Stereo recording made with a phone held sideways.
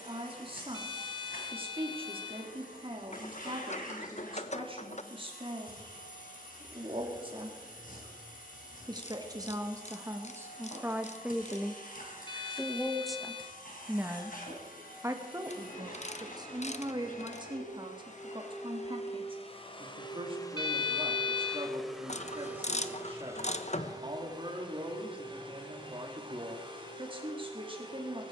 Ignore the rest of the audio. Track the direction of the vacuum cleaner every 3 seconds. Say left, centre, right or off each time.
left, left, left, left, left, left, left, centre, right, right.